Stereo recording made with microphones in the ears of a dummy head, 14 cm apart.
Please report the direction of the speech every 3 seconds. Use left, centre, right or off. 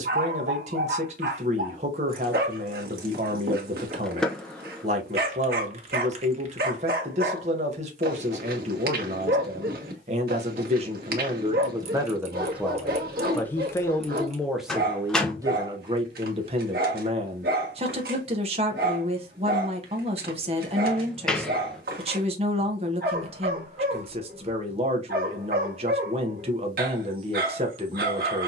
right, right, right, right, centre, right, right, right, right, right.